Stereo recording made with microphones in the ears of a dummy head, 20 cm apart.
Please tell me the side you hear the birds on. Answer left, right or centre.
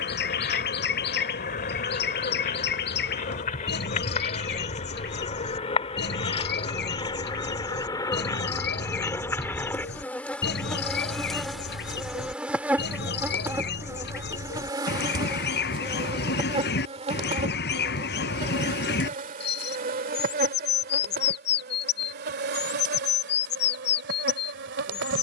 left.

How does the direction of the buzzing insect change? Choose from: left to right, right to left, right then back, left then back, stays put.
left to right.